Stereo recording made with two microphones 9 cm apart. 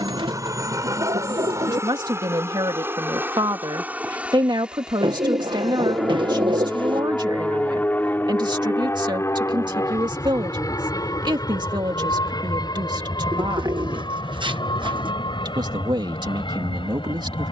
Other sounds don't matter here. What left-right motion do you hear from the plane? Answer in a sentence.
In this clip you hear the plane move from right to left.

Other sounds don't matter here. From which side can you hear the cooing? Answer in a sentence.
In this clip you hear the cooing on the right.